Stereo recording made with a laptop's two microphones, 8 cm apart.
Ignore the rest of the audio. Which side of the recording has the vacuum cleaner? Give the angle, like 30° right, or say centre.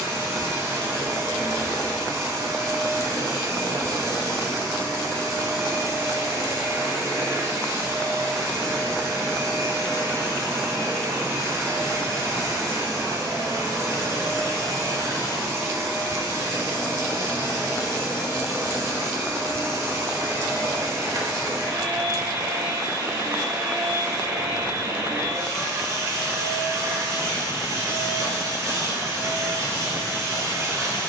40° right.